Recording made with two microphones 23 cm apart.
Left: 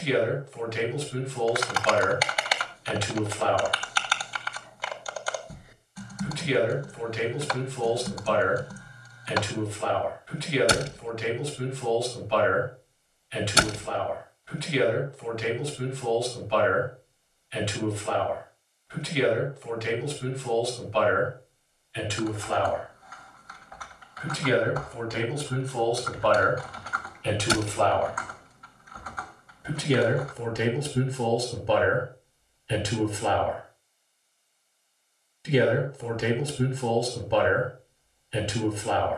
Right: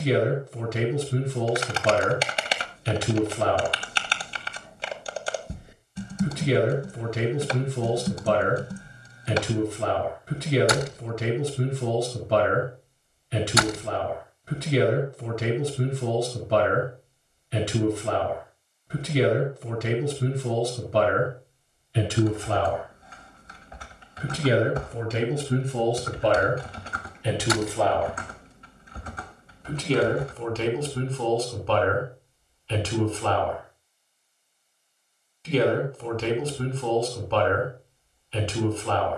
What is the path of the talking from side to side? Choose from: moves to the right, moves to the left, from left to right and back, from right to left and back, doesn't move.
moves to the left.